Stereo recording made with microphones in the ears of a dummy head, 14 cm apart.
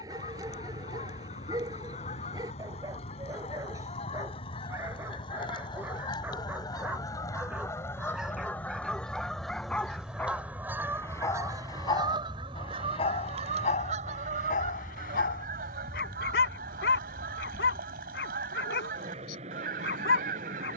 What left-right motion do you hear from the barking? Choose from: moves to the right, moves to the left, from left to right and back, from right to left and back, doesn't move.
moves to the left.